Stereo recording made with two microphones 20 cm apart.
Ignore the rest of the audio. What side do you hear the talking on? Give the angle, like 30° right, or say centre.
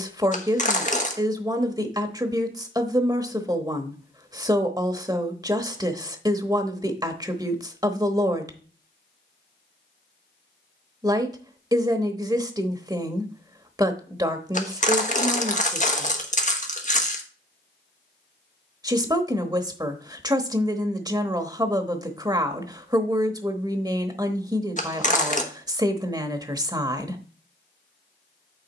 20° right.